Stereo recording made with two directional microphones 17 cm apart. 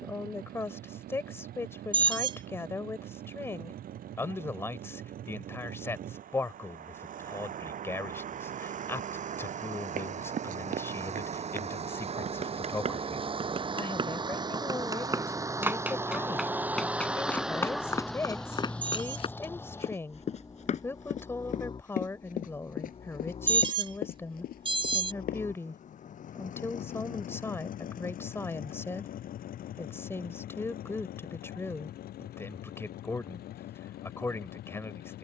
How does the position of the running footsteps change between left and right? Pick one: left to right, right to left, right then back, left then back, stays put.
right to left.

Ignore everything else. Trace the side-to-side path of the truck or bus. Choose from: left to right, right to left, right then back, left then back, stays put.
right to left.